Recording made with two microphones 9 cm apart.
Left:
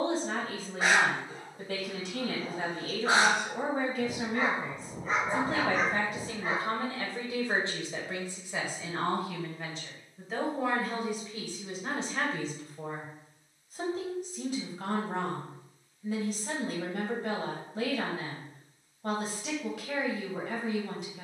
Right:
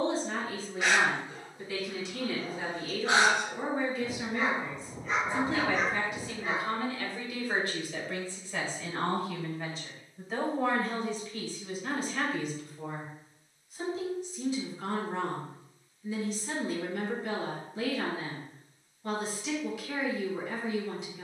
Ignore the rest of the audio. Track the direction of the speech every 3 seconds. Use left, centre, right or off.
left, left, left, centre, left, left, left.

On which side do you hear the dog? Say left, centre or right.
left.